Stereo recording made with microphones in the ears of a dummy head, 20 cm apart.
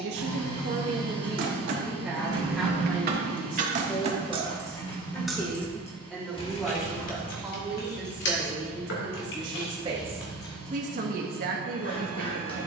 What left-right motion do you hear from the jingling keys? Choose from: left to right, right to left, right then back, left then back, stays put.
right to left.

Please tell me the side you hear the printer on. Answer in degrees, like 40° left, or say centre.
20° left.